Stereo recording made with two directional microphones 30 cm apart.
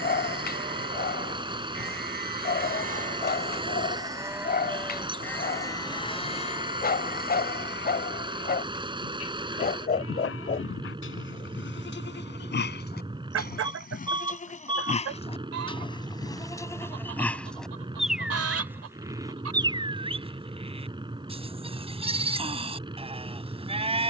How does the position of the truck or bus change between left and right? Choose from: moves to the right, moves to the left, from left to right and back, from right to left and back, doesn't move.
doesn't move.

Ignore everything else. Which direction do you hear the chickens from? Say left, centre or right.
right.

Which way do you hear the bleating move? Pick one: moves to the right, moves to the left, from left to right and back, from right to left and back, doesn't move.
from right to left and back.